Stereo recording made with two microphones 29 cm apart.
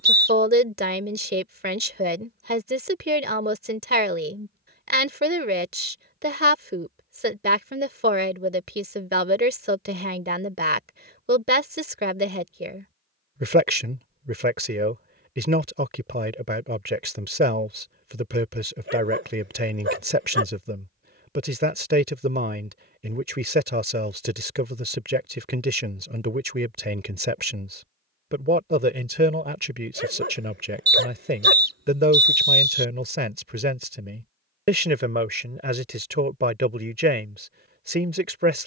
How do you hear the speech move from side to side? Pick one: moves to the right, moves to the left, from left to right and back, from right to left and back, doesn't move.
doesn't move.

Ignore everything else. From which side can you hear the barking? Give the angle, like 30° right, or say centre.
40° right.